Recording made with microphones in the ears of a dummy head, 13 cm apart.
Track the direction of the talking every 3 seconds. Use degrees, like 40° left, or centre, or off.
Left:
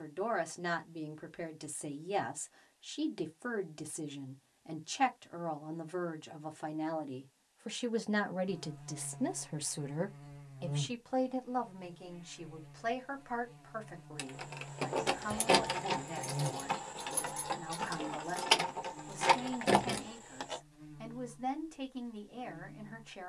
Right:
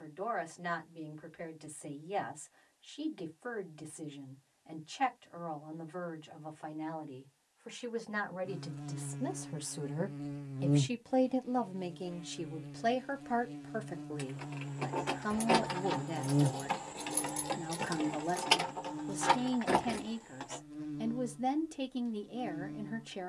50° left, 50° left, 40° left, 10° right, 40° right, 40° right, 40° right, 40° right.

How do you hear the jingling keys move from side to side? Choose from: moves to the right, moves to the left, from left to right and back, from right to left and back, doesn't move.
from left to right and back.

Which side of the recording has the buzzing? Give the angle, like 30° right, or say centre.
80° right.